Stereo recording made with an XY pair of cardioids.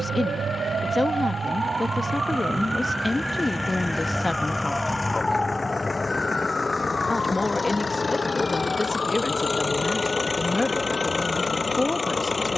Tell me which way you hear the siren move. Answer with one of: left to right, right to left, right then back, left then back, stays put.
right to left.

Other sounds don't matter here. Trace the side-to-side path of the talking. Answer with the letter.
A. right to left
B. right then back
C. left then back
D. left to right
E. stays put
E.